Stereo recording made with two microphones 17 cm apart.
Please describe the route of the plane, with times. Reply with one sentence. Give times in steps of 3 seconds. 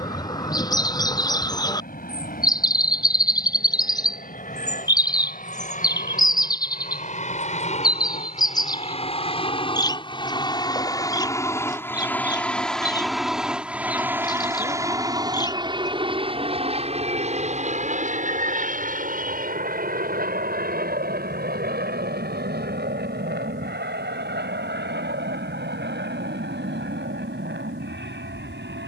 You can hear the plane on the left from 0 s, in the centre from 12 s and on the right from 15 s.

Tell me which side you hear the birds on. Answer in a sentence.
You can hear the birds on the left.